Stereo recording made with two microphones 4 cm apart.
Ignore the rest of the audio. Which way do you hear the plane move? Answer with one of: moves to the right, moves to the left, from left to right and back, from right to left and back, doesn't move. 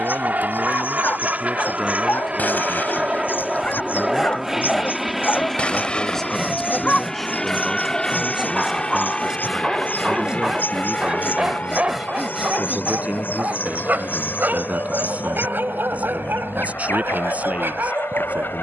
moves to the left.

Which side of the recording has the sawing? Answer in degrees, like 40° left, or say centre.
centre.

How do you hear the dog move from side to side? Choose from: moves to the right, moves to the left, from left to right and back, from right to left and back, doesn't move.
moves to the right.